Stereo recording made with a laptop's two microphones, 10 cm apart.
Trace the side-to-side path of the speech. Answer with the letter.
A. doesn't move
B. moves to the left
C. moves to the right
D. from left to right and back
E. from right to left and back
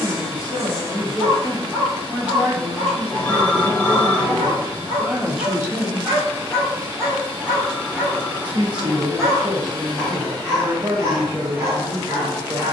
E.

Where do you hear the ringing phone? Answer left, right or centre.
centre.